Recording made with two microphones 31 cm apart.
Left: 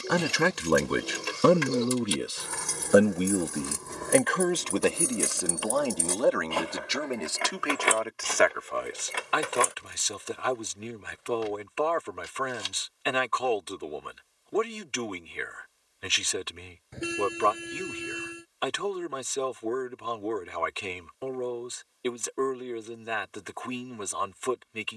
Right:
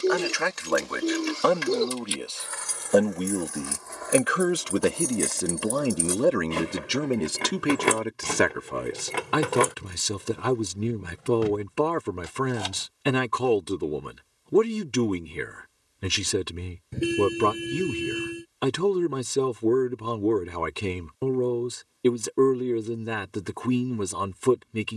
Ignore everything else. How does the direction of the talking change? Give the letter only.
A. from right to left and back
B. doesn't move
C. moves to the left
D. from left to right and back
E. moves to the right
E.